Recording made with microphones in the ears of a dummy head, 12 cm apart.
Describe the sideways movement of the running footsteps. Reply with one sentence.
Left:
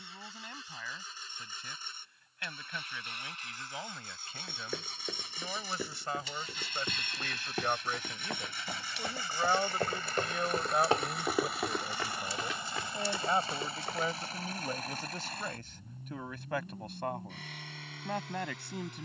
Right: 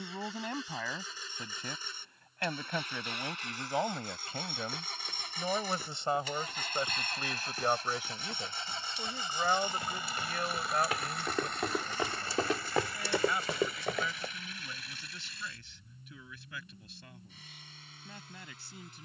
In this clip you hear the running footsteps go from the left side to the right.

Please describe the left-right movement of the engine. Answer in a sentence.
In this clip you hear the engine go from the right side to the left.